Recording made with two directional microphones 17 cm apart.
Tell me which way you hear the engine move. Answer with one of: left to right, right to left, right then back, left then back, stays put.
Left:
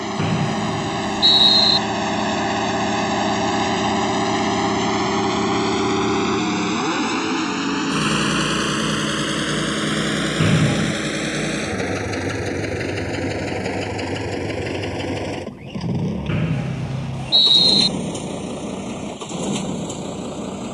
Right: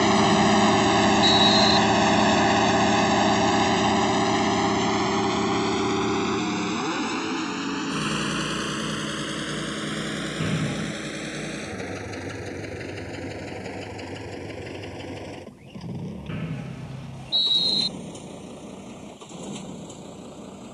right to left.